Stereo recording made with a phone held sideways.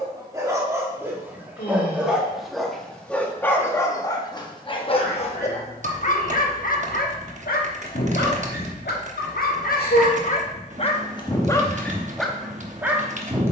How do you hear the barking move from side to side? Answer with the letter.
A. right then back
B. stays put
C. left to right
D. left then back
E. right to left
D.